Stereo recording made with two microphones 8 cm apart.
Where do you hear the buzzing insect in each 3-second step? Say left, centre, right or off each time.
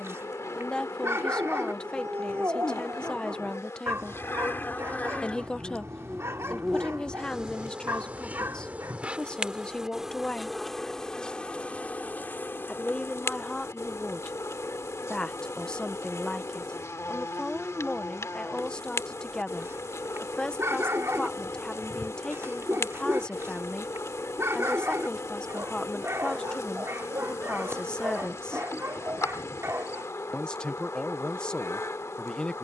left, left, centre, centre, left, left, left, left, left, left, left.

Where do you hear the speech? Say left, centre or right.
centre.